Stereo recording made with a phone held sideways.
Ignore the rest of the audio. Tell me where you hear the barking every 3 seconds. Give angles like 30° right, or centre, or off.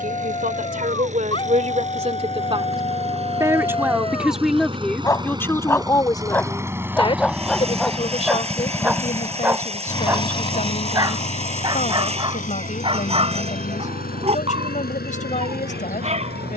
40° left, 30° left, centre, 20° right, 40° right, 40° right.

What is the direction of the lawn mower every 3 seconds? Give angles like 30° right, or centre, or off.
50° right, 30° right, 10° right, 30° left, 60° left, 70° left.